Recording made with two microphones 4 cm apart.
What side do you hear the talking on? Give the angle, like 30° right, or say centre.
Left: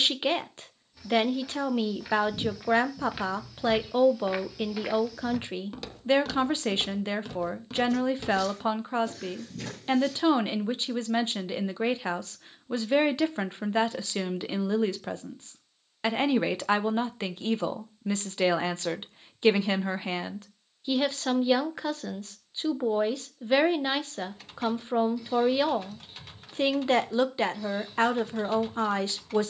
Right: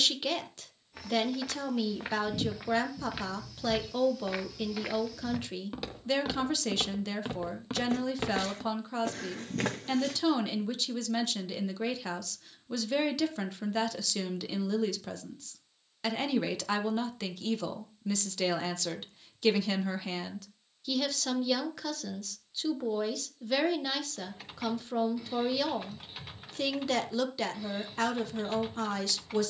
30° left.